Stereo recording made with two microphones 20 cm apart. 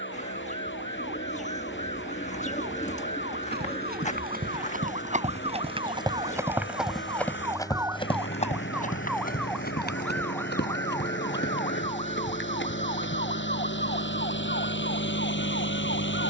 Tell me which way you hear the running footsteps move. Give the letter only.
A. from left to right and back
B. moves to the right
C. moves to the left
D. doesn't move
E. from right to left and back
C.